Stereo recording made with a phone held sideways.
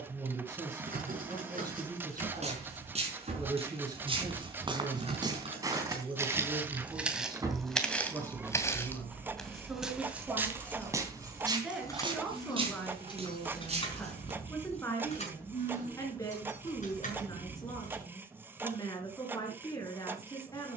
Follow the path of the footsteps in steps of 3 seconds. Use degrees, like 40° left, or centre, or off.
40° right, 30° right, centre, 10° right, 40° right, off, off.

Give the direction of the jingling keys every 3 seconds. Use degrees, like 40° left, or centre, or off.
50° right, 40° right, 20° right, 10° left, 30° left, 50° left, off.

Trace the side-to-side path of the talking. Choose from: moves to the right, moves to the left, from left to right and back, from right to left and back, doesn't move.
moves to the left.